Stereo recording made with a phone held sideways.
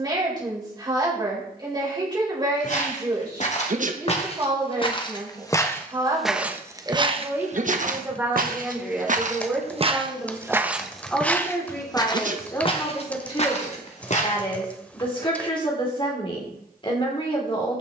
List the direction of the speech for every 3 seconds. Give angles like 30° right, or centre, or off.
30° right, 30° right, 20° right, centre, 30° left, 30° left.